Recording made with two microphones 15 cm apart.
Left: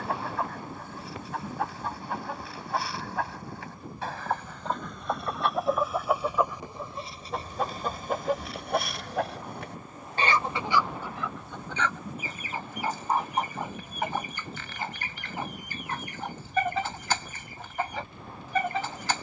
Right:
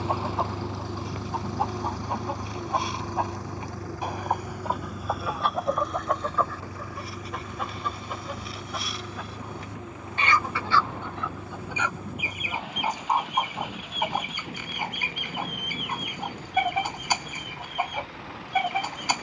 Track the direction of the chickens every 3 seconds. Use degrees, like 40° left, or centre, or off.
20° right, 10° right, 30° left, 20° left, 10° right, 10° right, 10° right.